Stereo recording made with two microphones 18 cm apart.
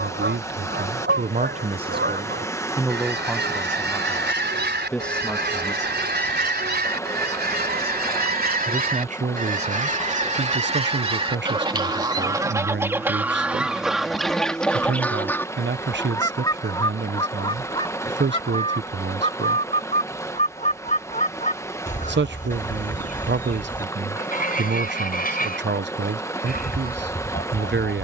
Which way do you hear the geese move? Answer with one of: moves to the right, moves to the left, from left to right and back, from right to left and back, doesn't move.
moves to the left.